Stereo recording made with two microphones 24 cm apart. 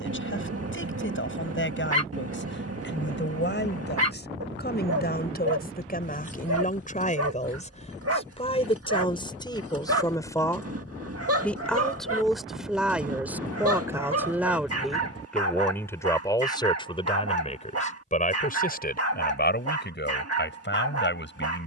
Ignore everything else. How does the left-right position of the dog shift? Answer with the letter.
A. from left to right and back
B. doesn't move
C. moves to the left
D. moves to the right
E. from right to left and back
B.